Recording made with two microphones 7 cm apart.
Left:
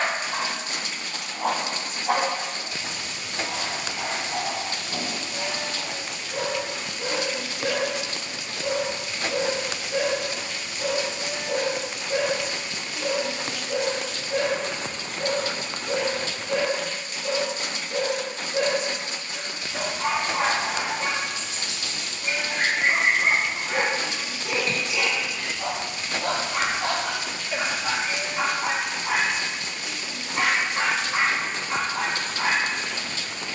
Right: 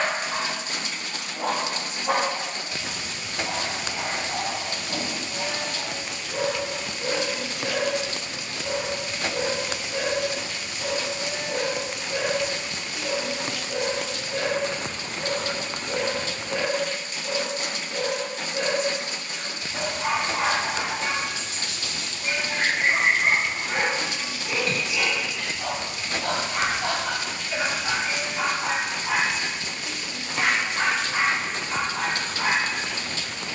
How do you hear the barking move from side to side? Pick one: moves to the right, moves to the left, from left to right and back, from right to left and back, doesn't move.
moves to the left.